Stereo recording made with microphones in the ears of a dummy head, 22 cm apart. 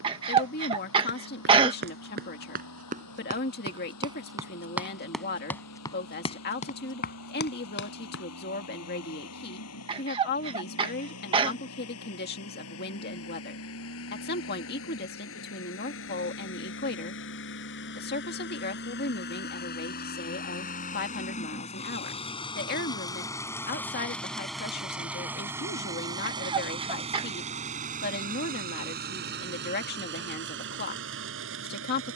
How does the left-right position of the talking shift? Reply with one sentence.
You can hear the talking stay put.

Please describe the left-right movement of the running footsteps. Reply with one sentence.
You can hear the running footsteps travel towards the left.